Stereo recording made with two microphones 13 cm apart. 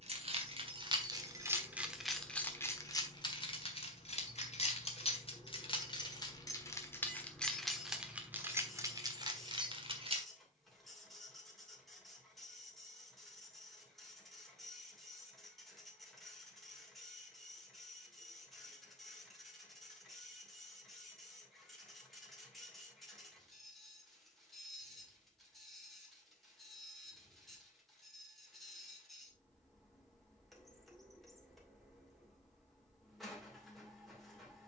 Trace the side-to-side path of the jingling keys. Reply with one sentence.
In this clip you hear the jingling keys go left and come back.